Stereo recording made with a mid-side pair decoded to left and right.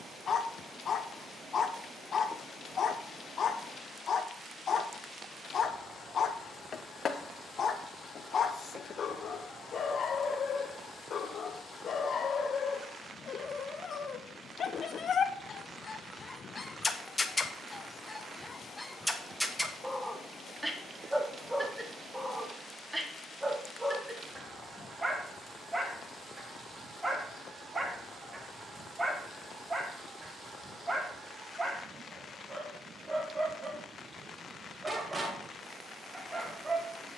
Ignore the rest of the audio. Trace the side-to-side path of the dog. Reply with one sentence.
In this clip you hear the dog move to the right.